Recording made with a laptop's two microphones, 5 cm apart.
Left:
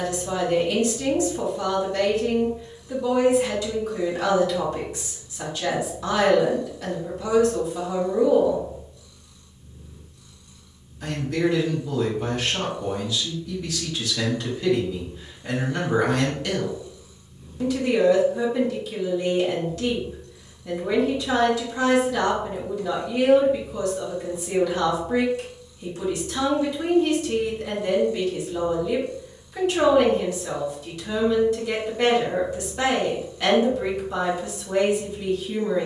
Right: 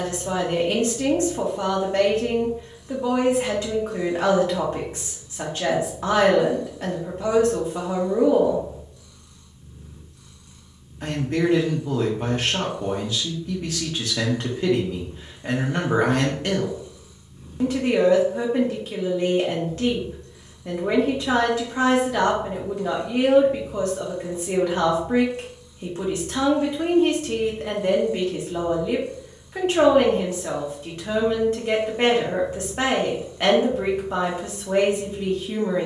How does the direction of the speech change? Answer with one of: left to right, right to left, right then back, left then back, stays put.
stays put.